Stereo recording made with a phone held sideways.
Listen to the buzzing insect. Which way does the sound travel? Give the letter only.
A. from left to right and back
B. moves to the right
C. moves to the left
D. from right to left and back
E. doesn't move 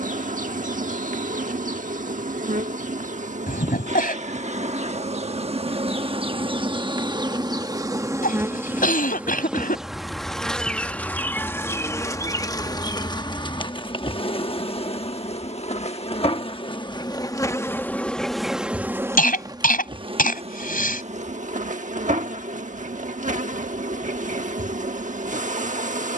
D.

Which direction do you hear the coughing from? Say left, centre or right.
left.